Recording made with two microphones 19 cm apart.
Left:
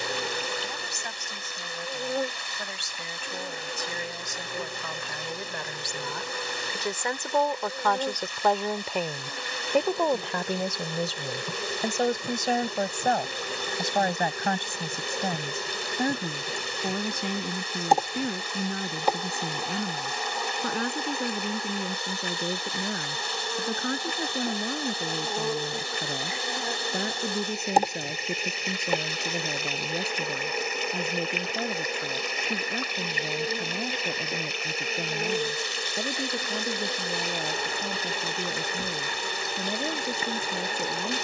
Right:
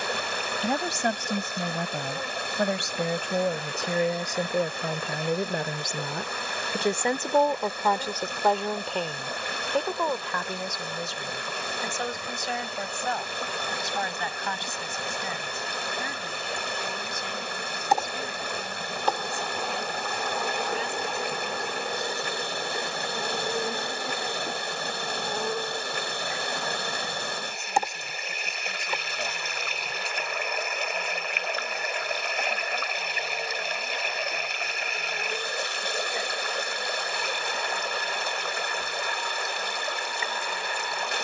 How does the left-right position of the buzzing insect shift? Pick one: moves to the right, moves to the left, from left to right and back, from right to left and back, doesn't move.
from left to right and back.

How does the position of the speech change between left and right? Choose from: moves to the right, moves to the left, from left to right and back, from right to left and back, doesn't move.
moves to the left.